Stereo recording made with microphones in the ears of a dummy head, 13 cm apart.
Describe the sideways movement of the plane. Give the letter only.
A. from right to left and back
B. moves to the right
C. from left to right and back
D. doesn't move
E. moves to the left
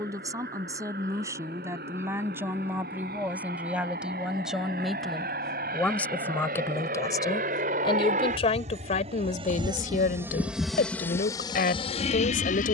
E.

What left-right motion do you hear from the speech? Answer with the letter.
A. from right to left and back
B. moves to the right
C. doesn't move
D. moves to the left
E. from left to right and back
D.